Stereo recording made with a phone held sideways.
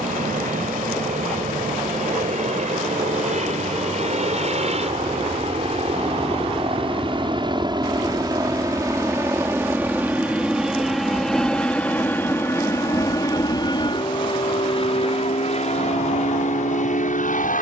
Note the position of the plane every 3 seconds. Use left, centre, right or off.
right, right, right, centre, left, left.